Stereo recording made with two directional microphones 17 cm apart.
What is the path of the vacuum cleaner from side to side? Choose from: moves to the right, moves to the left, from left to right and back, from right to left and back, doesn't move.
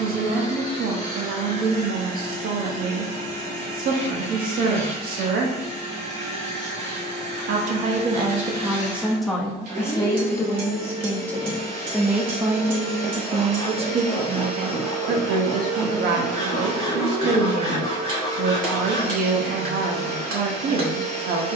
doesn't move.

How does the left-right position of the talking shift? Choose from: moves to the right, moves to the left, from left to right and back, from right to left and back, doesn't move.
from right to left and back.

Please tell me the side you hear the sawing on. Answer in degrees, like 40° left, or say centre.
40° right.